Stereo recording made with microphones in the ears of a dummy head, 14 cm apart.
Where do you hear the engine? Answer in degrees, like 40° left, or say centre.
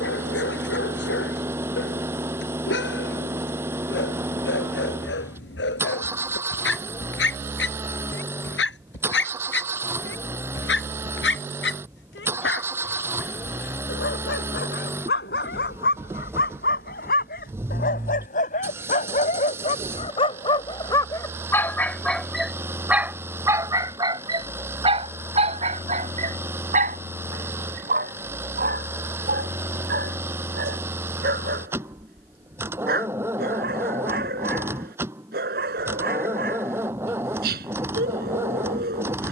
20° right.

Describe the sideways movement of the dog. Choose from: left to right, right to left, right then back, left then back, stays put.
left to right.